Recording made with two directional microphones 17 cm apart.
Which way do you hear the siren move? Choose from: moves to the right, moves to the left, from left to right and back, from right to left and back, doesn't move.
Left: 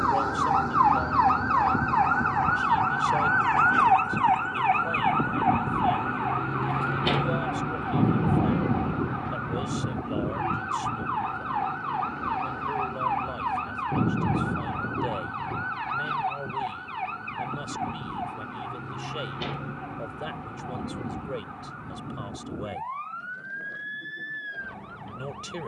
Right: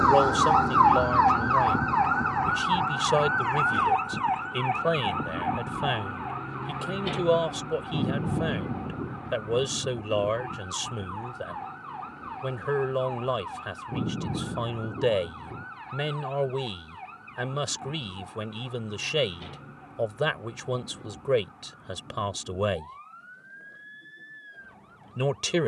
moves to the left.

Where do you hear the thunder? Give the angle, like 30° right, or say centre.
20° left.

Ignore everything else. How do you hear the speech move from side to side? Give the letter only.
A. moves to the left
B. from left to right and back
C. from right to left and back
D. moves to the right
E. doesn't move
E.